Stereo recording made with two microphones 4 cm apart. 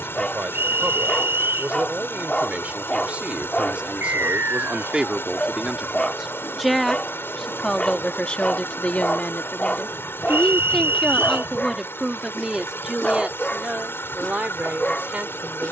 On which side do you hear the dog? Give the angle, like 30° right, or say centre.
30° left.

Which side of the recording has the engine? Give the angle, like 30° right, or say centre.
70° left.